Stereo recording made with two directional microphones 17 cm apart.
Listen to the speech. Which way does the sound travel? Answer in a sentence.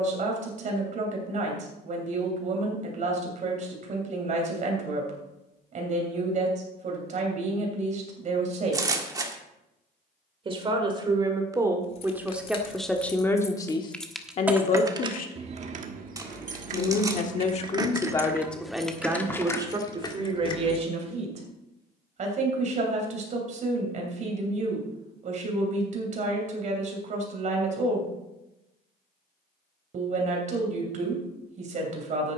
In this clip you hear the speech go left and come back.